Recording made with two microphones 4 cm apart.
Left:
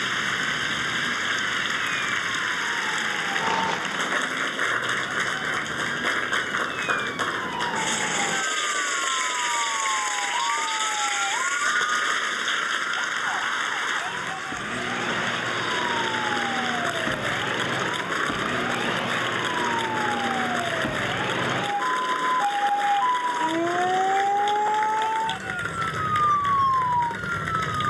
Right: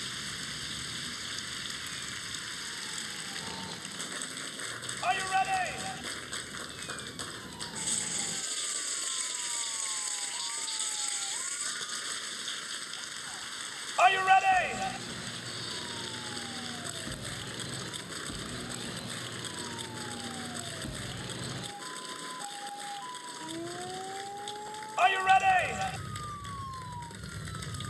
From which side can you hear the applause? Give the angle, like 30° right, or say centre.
60° left.